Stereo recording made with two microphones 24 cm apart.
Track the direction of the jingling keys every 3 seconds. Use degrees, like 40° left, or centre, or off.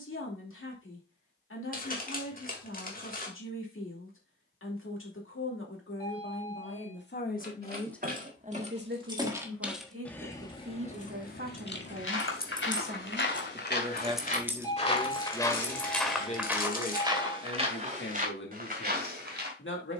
off, off, 30° right, 20° left, 10° left, 30° right, off.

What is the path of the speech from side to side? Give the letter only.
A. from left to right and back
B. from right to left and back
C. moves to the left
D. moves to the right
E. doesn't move
A.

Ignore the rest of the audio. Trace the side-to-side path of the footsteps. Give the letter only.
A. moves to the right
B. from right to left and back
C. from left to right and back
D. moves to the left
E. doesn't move
A.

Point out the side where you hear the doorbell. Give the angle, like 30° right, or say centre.
20° left.